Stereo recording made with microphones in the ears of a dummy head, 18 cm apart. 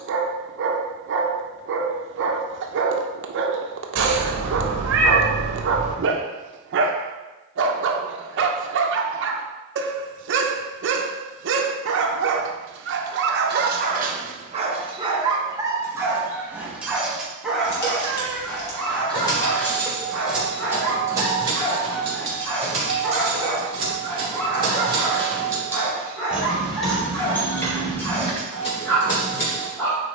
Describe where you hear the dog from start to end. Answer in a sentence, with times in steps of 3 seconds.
You can hear the dog on the right from 0 s and in the centre from 15 s.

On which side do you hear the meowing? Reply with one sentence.
In this clip you hear the meowing on the right.